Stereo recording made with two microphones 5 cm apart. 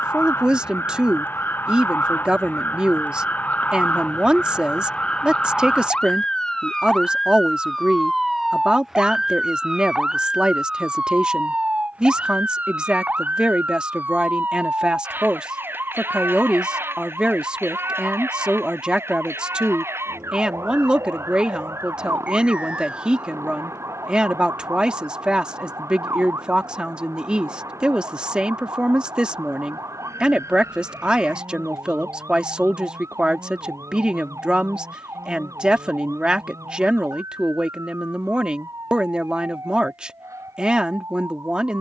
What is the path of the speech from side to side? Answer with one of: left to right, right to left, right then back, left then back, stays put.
stays put.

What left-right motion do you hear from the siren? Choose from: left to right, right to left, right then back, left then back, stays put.
left to right.